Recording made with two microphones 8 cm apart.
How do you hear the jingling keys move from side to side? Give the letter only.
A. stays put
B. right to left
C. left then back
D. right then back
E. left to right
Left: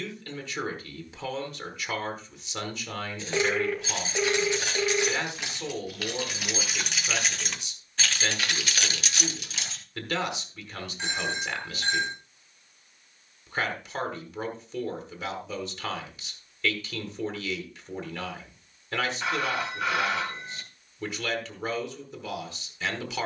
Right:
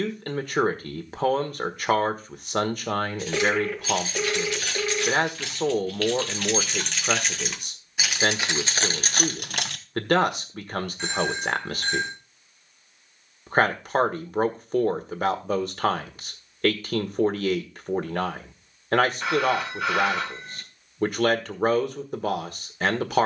E.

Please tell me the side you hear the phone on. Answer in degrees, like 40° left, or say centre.
centre.